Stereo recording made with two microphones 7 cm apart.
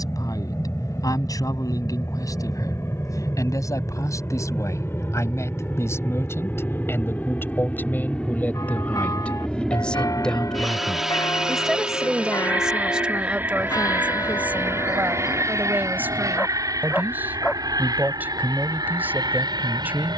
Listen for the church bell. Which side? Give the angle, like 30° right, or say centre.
50° left.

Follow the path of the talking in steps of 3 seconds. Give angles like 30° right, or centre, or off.
50° left, 50° left, 30° left, 10° left, 10° right, 20° right, 20° right.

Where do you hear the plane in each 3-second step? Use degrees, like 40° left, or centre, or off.
50° left, 40° left, 20° left, centre, 30° right, 50° right, 60° right.